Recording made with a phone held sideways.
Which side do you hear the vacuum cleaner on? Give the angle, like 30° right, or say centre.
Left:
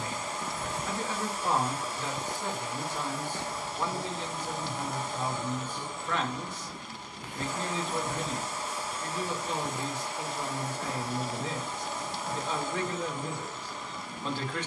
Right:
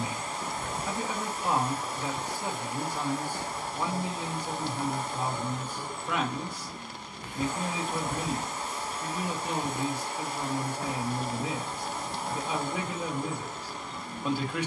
50° right.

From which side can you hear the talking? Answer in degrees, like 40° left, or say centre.
10° right.